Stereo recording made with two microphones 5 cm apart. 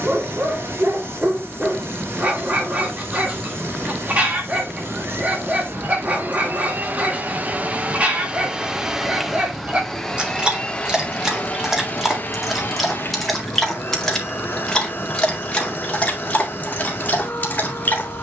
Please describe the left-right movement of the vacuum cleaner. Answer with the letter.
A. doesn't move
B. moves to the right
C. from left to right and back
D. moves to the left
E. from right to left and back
D.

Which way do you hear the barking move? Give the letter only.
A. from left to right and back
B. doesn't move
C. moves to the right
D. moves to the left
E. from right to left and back
D.